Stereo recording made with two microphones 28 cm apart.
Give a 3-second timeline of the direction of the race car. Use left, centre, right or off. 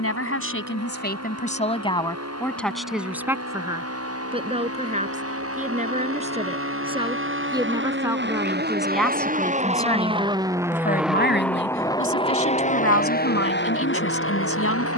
right, right, right, centre, left.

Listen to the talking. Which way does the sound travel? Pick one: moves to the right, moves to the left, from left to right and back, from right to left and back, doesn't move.
from left to right and back.